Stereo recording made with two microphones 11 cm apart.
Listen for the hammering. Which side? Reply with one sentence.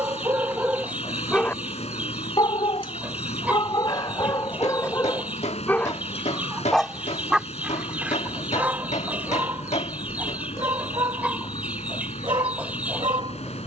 In this clip you hear the hammering on the left.